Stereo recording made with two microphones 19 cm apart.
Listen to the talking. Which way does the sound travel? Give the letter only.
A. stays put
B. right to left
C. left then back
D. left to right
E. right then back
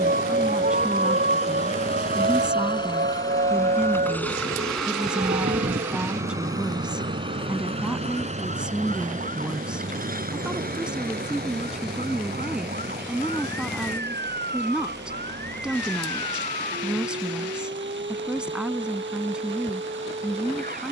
A.